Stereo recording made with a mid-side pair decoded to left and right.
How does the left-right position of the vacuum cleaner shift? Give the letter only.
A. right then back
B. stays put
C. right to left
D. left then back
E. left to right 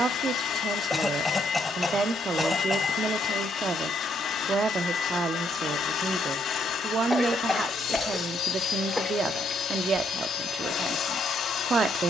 B.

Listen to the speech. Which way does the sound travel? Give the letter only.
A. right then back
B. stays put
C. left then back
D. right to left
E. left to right
B.